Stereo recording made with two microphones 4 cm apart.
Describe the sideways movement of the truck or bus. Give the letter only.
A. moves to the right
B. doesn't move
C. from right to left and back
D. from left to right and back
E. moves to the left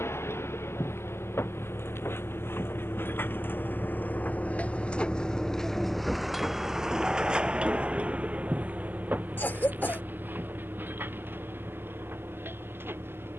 A.